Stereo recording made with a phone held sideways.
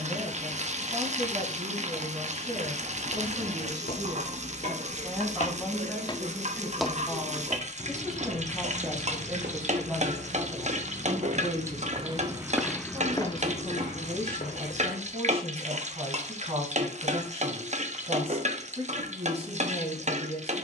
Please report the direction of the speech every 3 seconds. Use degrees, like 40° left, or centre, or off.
40° right, 20° right, centre, 10° right, 30° right, 40° right, 40° right.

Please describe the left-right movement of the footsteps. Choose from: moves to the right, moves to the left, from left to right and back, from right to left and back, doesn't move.
from left to right and back.